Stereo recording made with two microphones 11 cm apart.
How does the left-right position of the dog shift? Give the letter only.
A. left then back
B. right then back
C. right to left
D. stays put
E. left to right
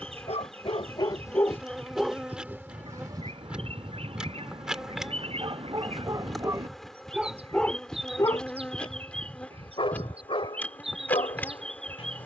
B.